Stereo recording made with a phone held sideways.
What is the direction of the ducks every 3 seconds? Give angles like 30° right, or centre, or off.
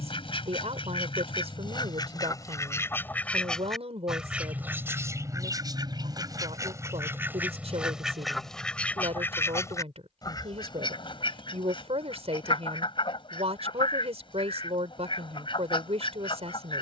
40° left, 10° right, 10° right, 30° left, 40° left, 40° left.